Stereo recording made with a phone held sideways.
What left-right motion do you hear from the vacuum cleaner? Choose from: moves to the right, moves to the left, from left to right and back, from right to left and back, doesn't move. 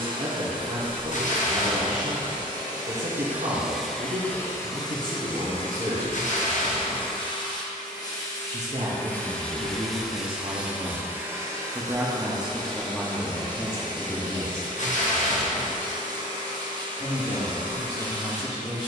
from right to left and back.